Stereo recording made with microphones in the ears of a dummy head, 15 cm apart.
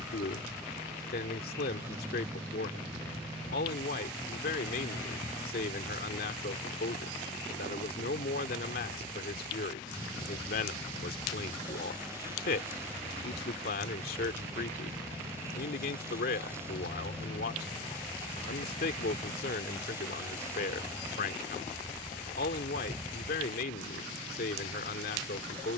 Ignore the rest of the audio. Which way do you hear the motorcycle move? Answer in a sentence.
You can hear the motorcycle stay put.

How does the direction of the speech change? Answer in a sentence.
You can hear the speech stay put.